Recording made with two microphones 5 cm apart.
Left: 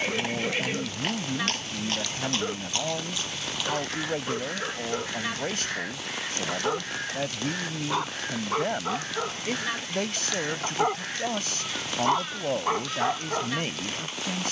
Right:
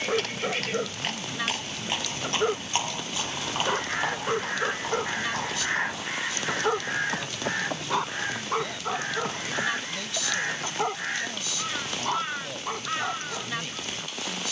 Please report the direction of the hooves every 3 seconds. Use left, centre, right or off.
centre, right, right, right, off.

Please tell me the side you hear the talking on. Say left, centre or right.
left.